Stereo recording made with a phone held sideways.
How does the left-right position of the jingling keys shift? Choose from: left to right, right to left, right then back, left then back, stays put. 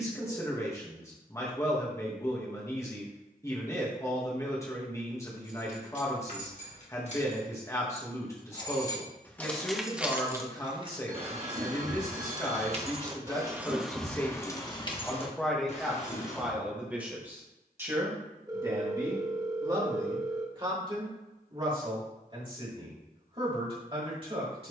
right then back.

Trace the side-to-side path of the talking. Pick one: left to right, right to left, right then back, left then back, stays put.
left to right.